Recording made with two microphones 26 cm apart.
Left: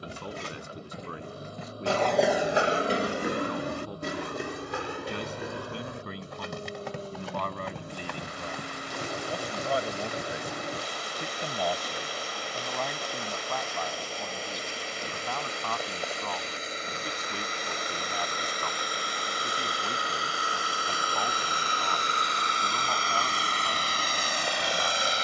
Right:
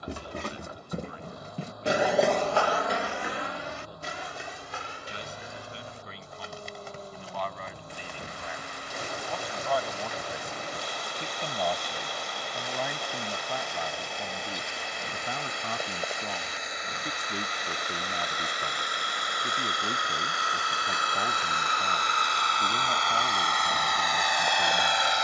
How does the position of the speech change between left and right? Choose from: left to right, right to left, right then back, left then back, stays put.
left to right.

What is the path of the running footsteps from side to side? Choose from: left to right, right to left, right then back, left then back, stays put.
right to left.